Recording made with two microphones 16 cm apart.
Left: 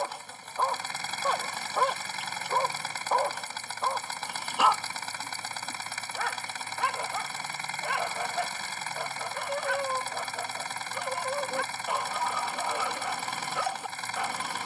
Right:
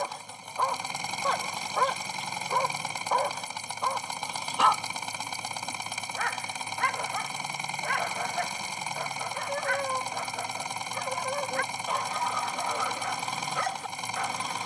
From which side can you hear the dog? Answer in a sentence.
In this clip you hear the dog in the centre.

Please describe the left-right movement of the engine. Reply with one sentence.
You can hear the engine stay in one place.